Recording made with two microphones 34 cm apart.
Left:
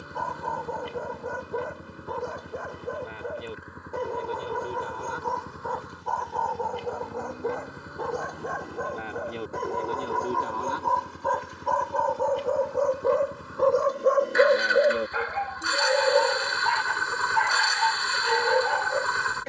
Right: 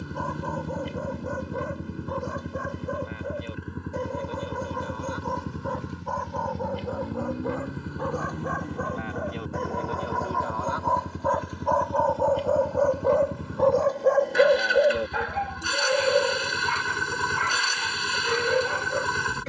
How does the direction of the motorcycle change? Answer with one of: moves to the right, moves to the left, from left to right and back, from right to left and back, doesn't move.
doesn't move.